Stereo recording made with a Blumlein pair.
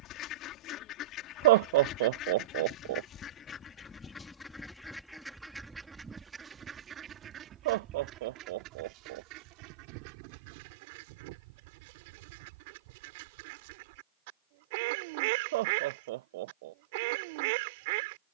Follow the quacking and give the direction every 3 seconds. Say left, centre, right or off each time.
left, centre, right, right, right, right.